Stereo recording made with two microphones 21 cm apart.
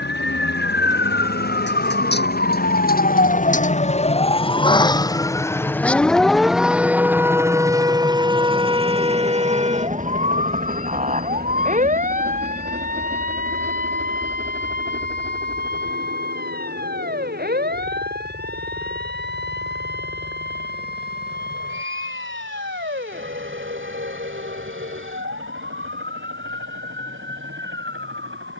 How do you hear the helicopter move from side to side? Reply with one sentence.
In this clip you hear the helicopter go from the left side to the right.